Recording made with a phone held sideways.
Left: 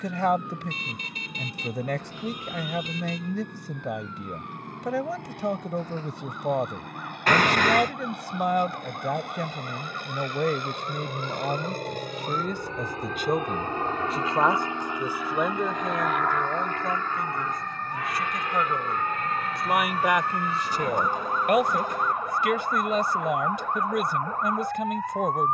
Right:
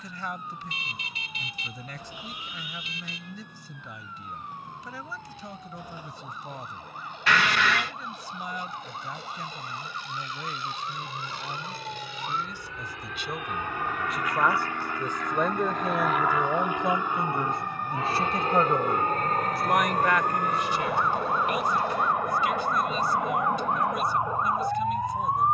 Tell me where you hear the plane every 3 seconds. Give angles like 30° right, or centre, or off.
80° left, 80° left, 70° left, 60° left, 30° left, centre, 40° right, 60° right, 60° right.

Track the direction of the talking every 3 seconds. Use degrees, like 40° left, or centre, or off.
70° left, 70° left, 70° left, 70° left, 40° left, 10° right, centre, 60° left, 60° left.